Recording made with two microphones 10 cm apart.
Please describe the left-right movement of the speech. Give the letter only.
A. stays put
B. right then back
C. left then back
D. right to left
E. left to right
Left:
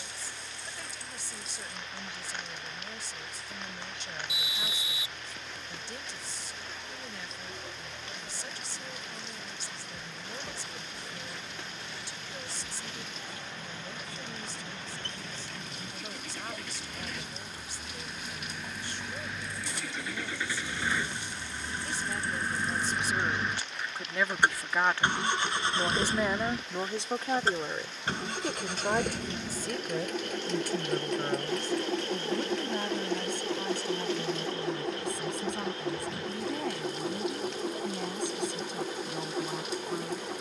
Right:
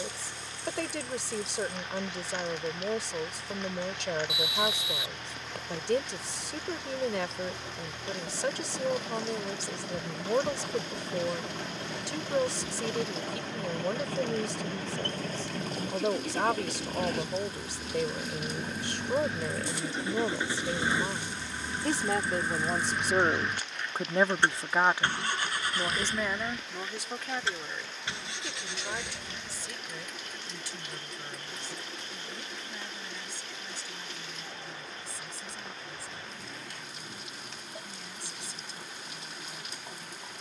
D.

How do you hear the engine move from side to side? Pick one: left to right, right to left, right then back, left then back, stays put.
right to left.